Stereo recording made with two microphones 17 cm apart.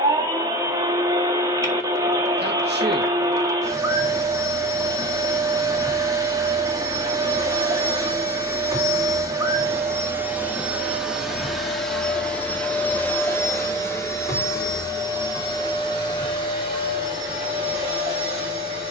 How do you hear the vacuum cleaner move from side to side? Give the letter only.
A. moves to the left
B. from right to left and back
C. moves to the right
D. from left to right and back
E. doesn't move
A.